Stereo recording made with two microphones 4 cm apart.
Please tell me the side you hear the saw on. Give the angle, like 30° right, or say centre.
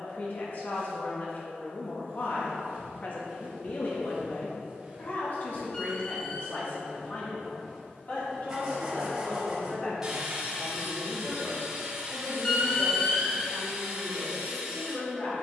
10° right.